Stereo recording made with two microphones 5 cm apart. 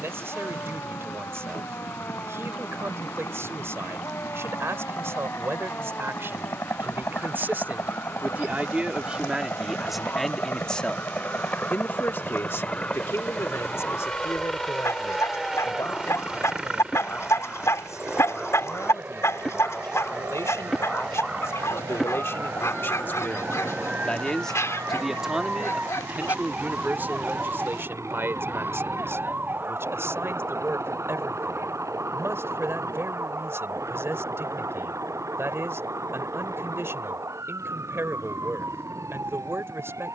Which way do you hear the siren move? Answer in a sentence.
In this clip you hear the siren travel towards the right.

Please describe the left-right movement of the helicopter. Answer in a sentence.
You can hear the helicopter move from left to right.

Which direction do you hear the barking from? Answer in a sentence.
In this clip you hear the barking on the left.